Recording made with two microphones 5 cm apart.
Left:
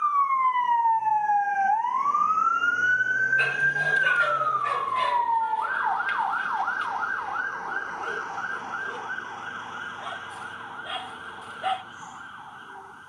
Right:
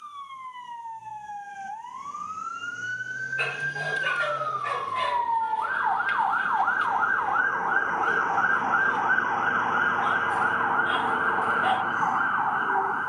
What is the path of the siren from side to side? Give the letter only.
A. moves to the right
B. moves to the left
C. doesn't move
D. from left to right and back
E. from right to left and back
A.